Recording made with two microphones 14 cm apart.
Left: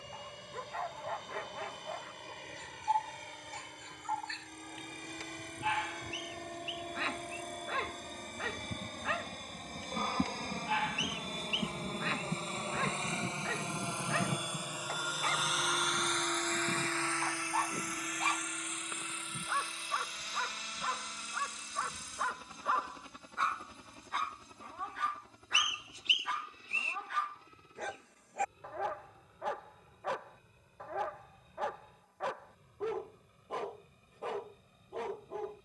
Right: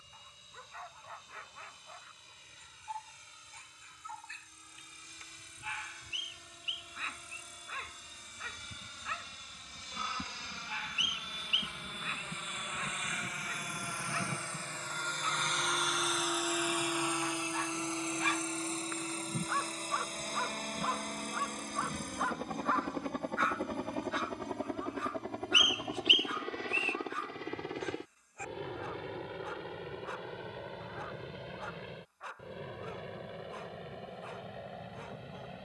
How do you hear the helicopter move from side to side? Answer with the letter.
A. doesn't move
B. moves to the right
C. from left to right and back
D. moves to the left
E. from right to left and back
B.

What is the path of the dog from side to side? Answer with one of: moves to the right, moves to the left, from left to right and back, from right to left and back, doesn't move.
from left to right and back.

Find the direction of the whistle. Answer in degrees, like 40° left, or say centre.
40° left.